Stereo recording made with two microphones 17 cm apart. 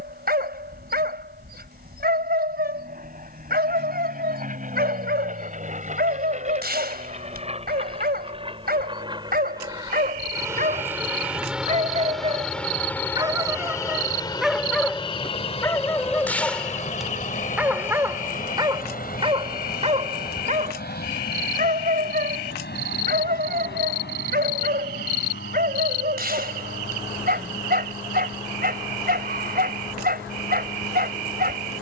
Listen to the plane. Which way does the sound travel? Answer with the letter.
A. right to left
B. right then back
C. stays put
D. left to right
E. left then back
A.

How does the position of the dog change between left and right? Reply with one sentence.
You can hear the dog go left and come back.